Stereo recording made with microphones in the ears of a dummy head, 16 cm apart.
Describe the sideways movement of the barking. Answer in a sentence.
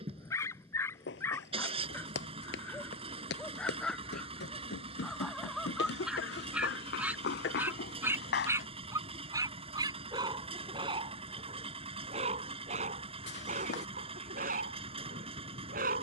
In this clip you hear the barking move to the right.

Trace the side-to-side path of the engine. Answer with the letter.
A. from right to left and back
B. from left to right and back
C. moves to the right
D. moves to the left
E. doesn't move
E.